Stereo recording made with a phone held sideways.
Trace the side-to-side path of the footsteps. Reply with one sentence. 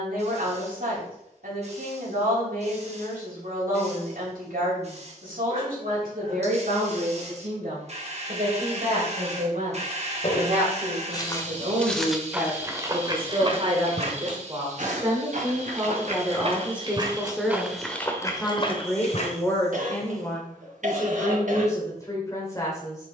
You can hear the footsteps move from left to right and back again.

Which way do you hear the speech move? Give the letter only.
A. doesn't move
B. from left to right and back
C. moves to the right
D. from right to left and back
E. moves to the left
E.